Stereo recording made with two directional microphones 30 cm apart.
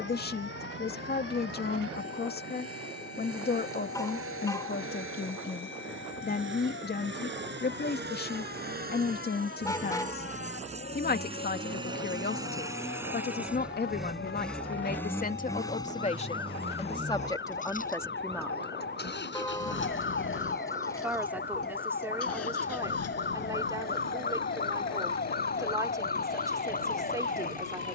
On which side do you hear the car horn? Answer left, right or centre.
centre.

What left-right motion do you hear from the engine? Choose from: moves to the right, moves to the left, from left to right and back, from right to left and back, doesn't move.
moves to the left.